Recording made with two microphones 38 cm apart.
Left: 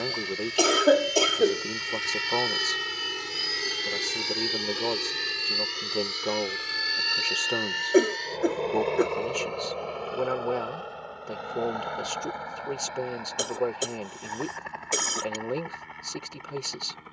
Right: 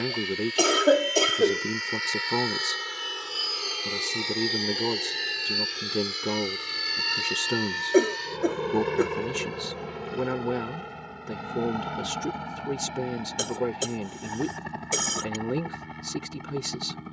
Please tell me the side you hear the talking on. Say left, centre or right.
right.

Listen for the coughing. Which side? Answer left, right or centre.
centre.